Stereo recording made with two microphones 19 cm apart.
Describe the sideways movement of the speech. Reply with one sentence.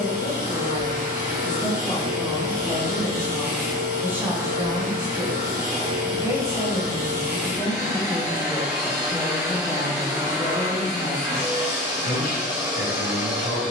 In this clip you hear the speech go right and come back.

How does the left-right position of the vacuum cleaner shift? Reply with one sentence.
In this clip you hear the vacuum cleaner stay in one place.